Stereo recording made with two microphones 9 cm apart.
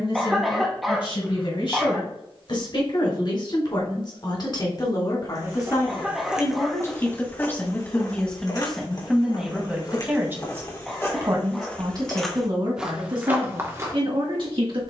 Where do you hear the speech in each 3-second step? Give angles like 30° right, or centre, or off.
60° left, 50° left, 20° left, 20° right, 50° right.